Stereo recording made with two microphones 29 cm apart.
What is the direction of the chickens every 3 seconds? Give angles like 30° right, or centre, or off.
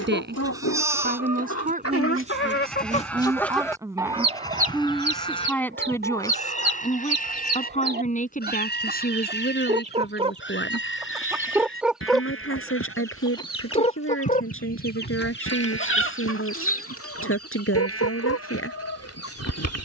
60° left, 20° right, 40° right, 20° right, 20° left, 50° left, 60° left.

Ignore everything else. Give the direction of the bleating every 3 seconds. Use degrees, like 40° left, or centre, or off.
centre, 10° left, 30° left, 40° left, 50° left, 60° left, 60° left.